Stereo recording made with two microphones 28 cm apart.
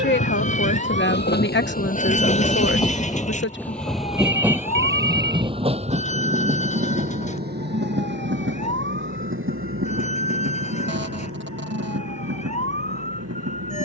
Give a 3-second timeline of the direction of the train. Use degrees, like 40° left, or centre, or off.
30° left, 10° right, 30° right, 50° right, 60° right.